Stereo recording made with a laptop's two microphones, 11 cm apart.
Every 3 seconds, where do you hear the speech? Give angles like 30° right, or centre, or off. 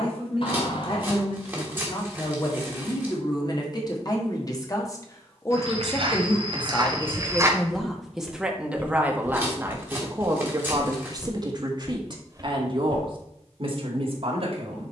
50° left, 30° left, centre, 30° right, 50° right.